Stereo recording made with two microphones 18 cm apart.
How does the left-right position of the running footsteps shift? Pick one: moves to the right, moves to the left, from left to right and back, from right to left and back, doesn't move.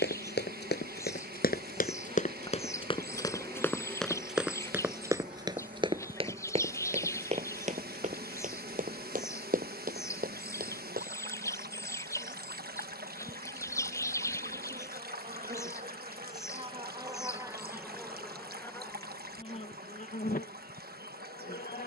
moves to the right.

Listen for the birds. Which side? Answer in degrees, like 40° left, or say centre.
20° left.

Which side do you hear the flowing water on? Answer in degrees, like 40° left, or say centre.
60° right.